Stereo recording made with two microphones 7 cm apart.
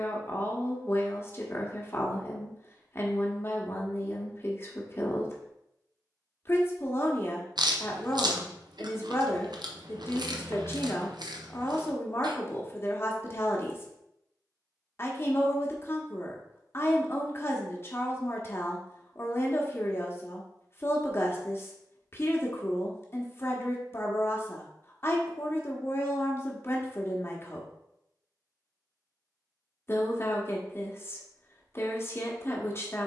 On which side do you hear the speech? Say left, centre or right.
left.